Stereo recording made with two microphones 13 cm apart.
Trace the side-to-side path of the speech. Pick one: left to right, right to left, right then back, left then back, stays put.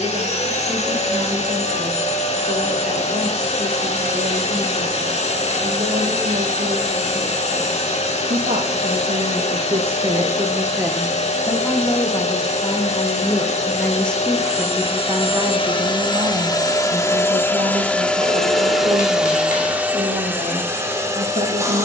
left then back.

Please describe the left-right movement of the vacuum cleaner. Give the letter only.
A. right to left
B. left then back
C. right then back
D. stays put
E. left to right
E.